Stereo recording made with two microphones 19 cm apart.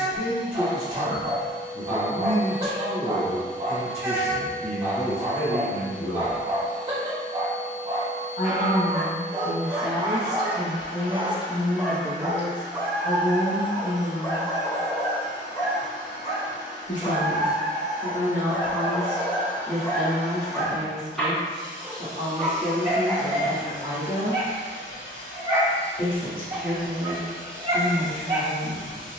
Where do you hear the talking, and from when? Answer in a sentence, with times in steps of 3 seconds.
In this clip you hear the talking on the left from 0 s, in the centre from 9 s and on the left from 12 s.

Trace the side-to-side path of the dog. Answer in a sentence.
You can hear the dog go left and come back.